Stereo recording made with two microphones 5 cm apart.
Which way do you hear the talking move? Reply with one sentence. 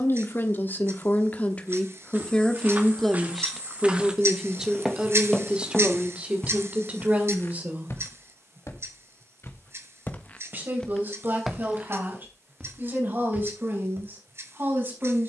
In this clip you hear the talking travel towards the right.